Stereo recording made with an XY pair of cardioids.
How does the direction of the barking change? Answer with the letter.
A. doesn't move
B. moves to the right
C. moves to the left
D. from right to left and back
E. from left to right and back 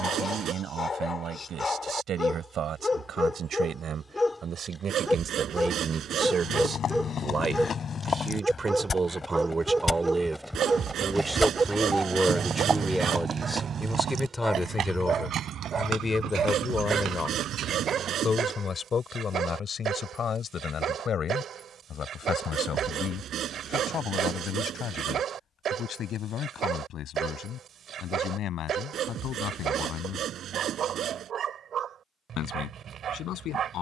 B.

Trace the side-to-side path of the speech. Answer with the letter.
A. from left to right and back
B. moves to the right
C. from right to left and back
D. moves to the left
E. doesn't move
D.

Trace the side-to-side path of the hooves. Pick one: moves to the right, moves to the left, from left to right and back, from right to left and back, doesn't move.
moves to the right.